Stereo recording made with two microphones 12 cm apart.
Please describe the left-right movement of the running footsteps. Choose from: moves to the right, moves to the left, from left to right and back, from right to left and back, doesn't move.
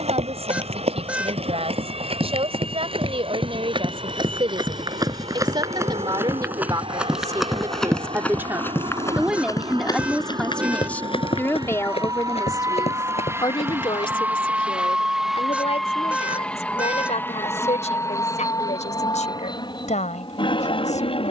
moves to the left.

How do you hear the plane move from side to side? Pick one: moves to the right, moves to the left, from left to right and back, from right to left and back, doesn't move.
moves to the left.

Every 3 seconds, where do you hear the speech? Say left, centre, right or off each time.
right, right, right, centre, left, left, left.